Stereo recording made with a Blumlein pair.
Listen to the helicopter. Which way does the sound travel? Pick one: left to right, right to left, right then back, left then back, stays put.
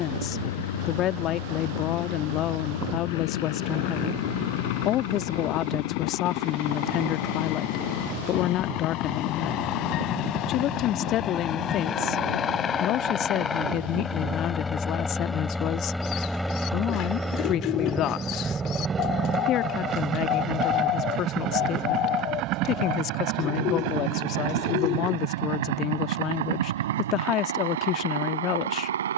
left to right.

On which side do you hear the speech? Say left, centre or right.
left.